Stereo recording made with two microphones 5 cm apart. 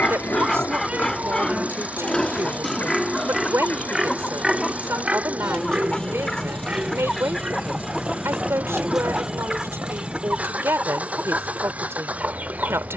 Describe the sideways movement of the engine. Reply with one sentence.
In this clip you hear the engine stay in one place.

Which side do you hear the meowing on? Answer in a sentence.
In this clip you hear the meowing on the right.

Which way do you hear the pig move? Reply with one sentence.
In this clip you hear the pig go from the left side to the right.